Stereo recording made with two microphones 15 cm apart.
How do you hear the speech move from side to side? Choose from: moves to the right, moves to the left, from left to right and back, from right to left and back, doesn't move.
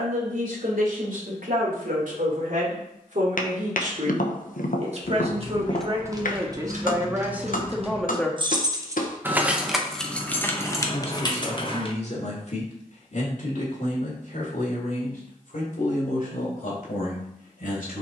moves to the left.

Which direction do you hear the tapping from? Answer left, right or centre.
left.